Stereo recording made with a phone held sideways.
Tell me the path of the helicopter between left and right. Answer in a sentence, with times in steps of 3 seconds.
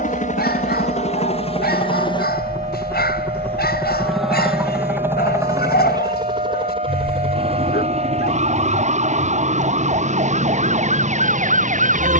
In this clip you hear the helicopter on the left from 0 s, in the centre from 3 s and on the right from 6 s.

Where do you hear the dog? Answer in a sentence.
You can hear the dog on the left.